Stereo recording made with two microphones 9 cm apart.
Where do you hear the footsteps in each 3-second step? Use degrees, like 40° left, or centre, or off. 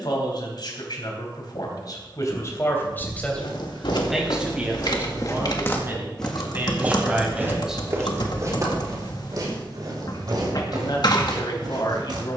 off, 60° left, 20° right, 50° right.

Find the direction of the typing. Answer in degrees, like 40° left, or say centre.
60° left.